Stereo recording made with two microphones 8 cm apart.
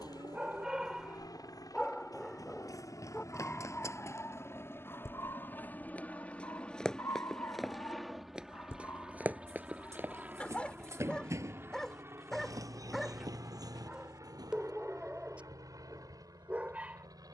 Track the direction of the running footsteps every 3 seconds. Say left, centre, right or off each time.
left, left, centre, right, right, off.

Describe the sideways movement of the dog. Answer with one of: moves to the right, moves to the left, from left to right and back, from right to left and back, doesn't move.
from right to left and back.